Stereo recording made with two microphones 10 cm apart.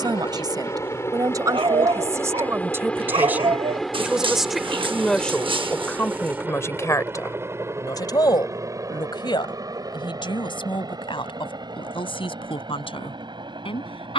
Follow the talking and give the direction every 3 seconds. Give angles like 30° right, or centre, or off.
40° right, centre, 30° left, 60° left, 70° left.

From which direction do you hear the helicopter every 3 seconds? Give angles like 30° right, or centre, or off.
30° left, centre, 20° right, 40° right, 50° right.